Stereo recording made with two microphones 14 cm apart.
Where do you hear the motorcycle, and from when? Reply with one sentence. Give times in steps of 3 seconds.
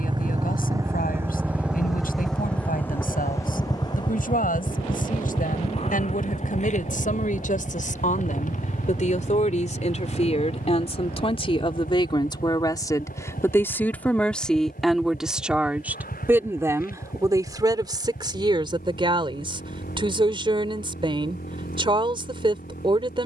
You can hear the motorcycle in the centre from 0 s and on the left from 3 s.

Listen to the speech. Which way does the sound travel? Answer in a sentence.
You can hear the speech go from the left side to the right.